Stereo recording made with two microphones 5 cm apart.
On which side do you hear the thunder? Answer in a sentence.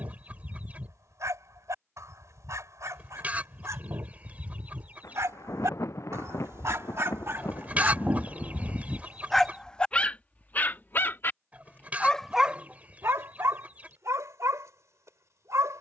In this clip you hear the thunder on the left.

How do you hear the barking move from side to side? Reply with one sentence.
You can hear the barking move from right to left and back again.